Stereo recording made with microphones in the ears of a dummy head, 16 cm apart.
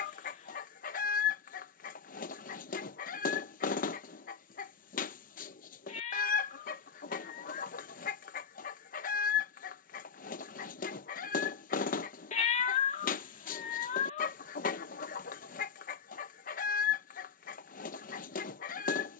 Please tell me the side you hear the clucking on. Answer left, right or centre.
left.